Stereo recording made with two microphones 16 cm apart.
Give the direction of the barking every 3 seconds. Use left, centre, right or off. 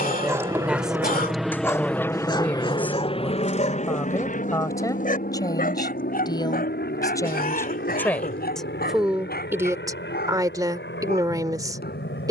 centre, left, left, left.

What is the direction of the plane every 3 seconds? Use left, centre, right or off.
centre, left, left, left.